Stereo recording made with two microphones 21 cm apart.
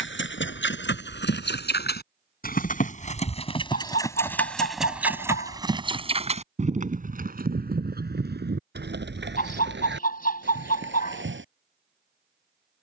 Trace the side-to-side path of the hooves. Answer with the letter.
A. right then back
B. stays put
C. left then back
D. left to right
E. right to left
D.